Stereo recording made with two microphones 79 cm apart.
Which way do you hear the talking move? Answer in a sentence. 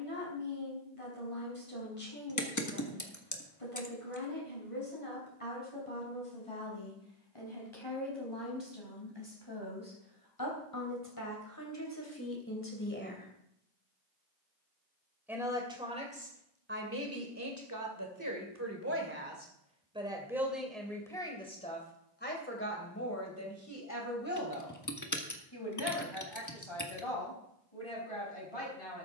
In this clip you hear the talking move from left to right and back again.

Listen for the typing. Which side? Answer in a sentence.
In this clip you hear the typing on the left.